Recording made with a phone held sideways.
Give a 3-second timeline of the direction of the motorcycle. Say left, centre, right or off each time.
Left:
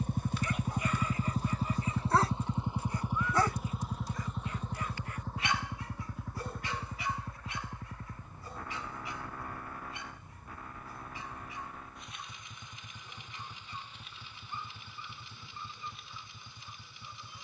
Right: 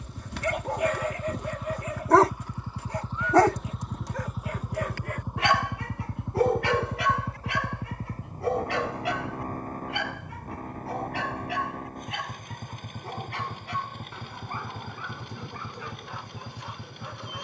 left, centre, right, right, right, right.